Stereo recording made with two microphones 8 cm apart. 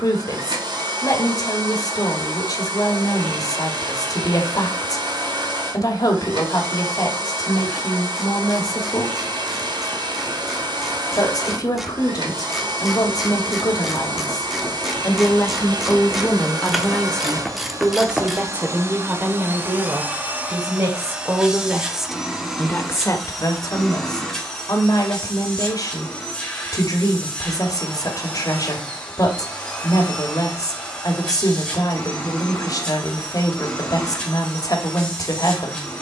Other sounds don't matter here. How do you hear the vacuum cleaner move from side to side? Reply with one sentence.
In this clip you hear the vacuum cleaner travel towards the left.